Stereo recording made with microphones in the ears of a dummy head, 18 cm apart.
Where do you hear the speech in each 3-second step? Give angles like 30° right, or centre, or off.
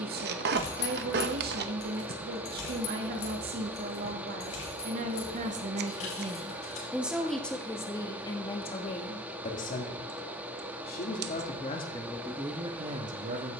50° right, 50° right, 10° left, 40° left, 20° right.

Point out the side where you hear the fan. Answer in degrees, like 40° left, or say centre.
10° right.